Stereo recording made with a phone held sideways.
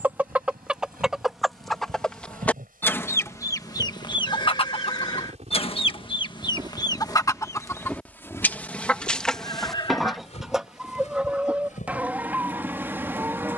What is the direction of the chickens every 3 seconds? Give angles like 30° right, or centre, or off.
centre, 30° left, 20° left, centre, 10° right.